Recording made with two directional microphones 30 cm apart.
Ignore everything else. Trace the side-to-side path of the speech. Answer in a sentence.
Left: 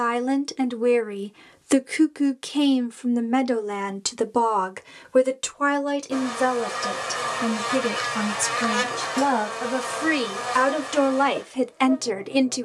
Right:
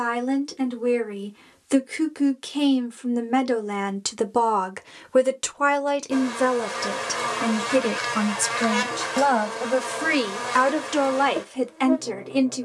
In this clip you hear the speech move from left to right and back again.